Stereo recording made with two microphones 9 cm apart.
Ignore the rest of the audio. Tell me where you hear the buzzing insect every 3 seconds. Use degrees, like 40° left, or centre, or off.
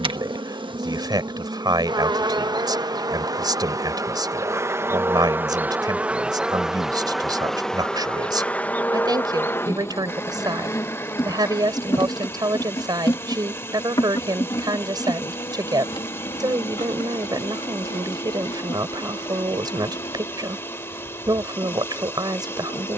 50° right, 30° right, centre, 30° left, 50° left, 60° left, 60° left, 60° left.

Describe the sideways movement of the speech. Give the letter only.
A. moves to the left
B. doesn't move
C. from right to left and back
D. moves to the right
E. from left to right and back
B.